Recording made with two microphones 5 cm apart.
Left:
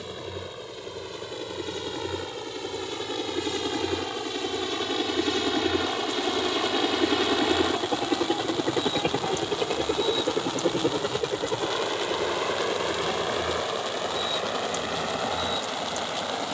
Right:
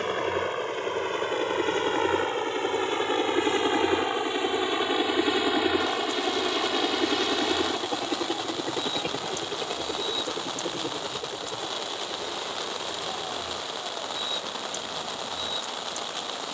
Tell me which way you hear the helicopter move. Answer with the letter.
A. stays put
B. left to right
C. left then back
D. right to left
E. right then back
D.